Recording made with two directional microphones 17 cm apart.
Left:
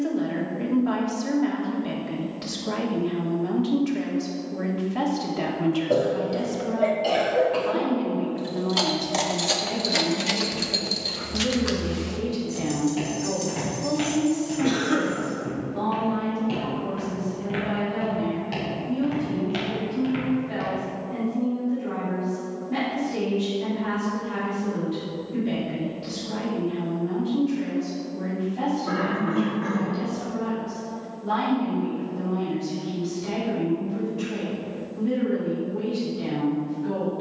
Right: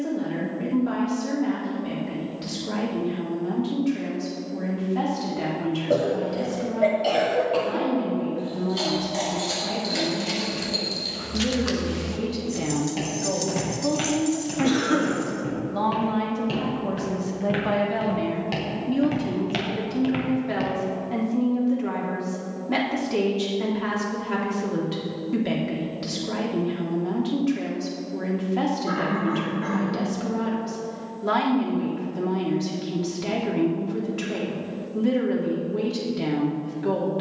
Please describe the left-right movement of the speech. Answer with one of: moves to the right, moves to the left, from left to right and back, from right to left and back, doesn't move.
moves to the right.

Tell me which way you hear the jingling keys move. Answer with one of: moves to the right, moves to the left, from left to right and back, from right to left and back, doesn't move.
moves to the right.